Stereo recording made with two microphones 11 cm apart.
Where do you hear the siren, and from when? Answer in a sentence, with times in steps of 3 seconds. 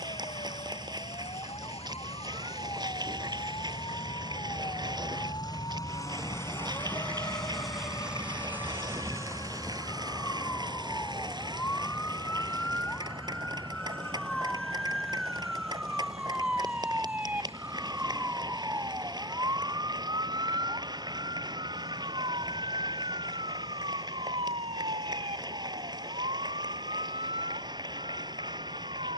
In this clip you hear the siren on the left from 0 s, in the centre from 12 s and on the right from 18 s.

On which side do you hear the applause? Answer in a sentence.
You can hear the applause on the right.